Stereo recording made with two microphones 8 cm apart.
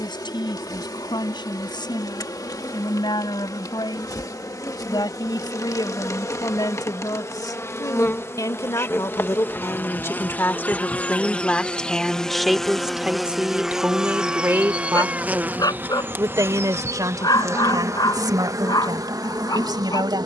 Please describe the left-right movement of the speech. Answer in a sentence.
In this clip you hear the speech go from the left side to the right.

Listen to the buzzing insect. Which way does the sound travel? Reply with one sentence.
You can hear the buzzing insect move from left to right.